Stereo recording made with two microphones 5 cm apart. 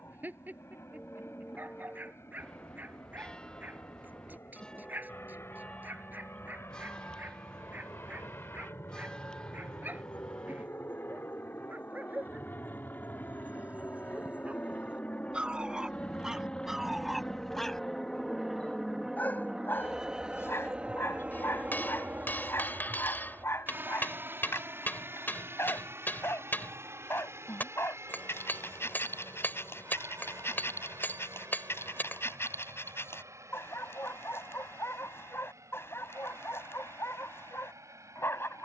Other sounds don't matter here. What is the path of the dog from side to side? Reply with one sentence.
You can hear the dog move to the left.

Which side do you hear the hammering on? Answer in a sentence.
In this clip you hear the hammering on the left.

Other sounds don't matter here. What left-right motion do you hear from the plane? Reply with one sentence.
You can hear the plane travel towards the right.